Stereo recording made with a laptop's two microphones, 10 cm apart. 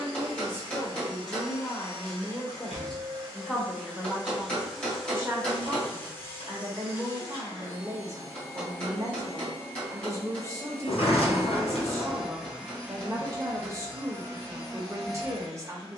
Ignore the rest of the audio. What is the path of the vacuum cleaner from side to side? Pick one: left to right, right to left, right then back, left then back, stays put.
left then back.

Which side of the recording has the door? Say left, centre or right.
left.